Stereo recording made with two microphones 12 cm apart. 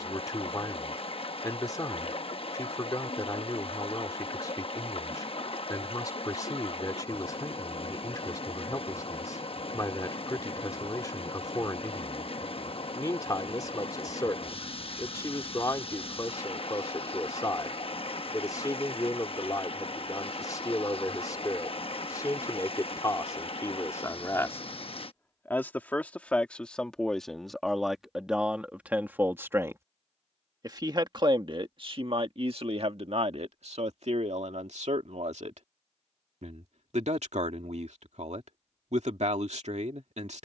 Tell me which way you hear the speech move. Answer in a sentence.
In this clip you hear the speech move from left to right.